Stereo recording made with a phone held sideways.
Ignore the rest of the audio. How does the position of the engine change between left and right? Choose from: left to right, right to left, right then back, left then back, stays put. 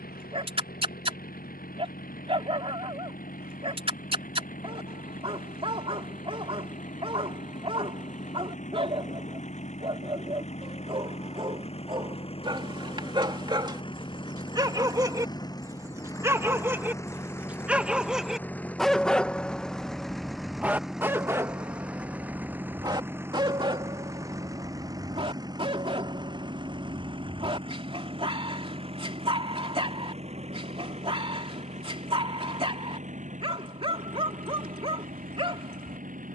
left to right.